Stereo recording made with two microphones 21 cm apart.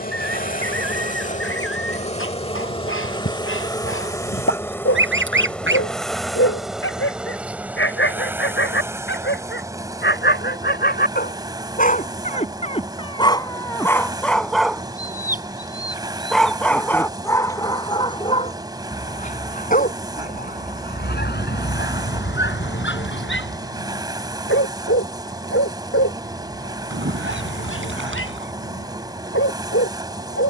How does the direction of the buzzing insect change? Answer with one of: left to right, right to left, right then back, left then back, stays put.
left to right.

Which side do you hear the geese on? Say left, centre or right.
right.